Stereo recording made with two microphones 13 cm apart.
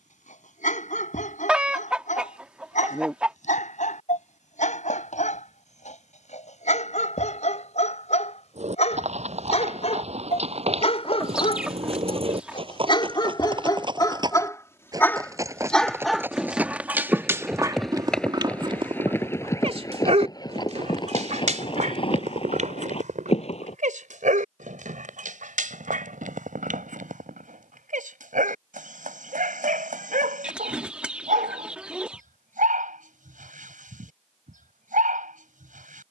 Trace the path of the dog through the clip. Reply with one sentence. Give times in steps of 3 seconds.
In this clip you hear the dog on the left from 0 s, in the centre from 15 s and on the right from 18 s.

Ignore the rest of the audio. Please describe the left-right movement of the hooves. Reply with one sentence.
You can hear the hooves move from right to left.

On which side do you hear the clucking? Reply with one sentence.
You can hear the clucking in the centre.